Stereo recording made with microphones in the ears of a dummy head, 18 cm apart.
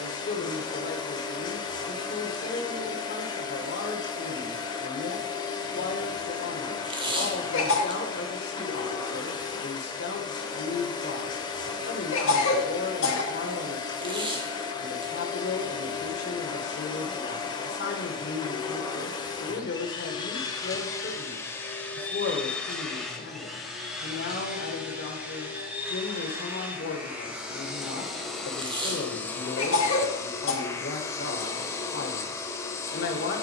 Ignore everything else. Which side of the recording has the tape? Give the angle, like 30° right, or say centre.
20° right.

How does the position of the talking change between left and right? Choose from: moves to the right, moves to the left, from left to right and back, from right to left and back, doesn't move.
doesn't move.